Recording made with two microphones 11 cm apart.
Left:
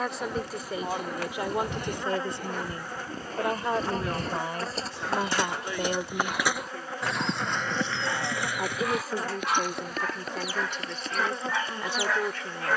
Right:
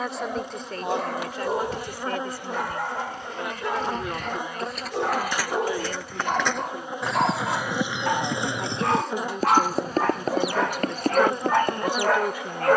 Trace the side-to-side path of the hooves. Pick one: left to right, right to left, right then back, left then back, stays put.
left to right.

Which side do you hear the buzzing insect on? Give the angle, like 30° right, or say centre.
20° right.